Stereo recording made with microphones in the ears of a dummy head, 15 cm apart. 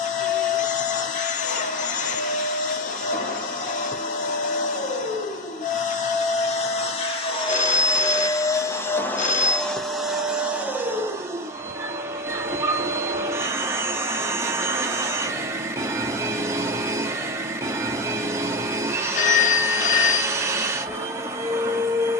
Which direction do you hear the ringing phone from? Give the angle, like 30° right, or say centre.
50° left.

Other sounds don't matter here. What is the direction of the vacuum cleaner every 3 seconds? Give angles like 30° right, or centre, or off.
50° left, 50° left, 30° left, 10° right, 20° right, 20° right, 20° right, 20° right.